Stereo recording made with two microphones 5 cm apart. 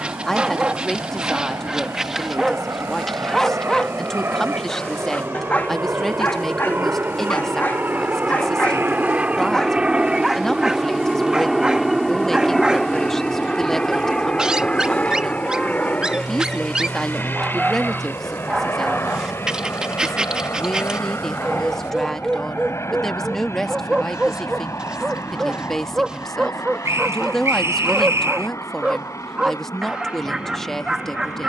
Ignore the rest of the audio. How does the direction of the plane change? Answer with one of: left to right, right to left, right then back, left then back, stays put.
right to left.